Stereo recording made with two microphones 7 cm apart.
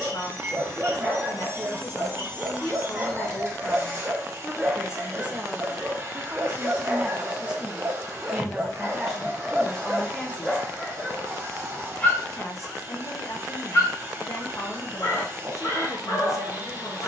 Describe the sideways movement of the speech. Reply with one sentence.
In this clip you hear the speech go right and come back.